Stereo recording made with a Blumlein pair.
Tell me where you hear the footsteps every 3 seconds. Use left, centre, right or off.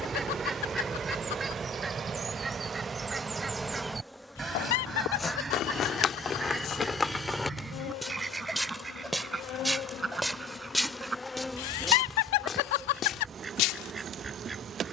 off, left, centre, centre, left.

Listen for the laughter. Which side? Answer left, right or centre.
left.